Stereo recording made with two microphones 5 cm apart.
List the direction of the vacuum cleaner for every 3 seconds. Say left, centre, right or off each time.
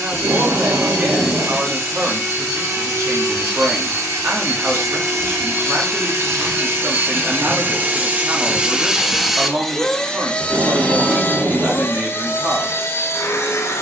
right, right, right, left, left.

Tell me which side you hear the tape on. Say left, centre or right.
right.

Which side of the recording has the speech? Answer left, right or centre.
right.